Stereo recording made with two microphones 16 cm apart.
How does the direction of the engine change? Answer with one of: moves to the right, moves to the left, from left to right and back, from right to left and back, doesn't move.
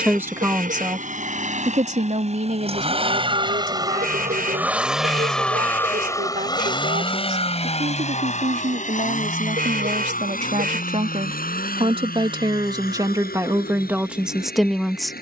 moves to the left.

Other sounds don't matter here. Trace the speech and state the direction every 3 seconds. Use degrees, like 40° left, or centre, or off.
40° right, 60° right, 60° right, 50° right, 20° right.